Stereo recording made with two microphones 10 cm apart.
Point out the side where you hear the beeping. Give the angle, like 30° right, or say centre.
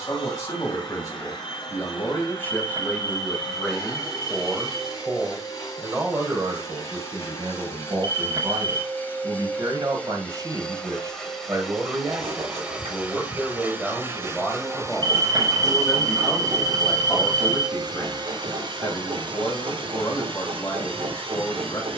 50° right.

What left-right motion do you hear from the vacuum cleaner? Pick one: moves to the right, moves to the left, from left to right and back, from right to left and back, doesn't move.
moves to the right.